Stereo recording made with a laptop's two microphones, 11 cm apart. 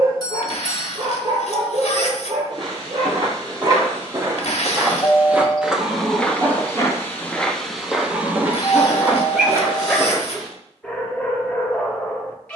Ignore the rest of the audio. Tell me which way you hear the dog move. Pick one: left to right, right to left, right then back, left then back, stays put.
right to left.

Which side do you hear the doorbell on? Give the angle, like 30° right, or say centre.
30° left.